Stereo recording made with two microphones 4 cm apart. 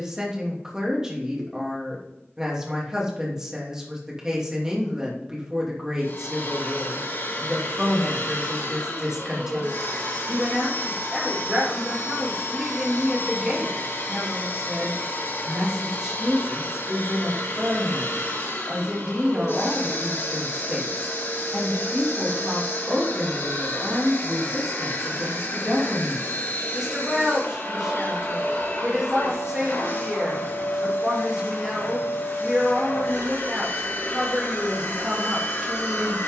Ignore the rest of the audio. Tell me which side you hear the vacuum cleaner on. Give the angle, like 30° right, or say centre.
70° left.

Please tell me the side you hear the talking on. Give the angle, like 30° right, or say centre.
10° right.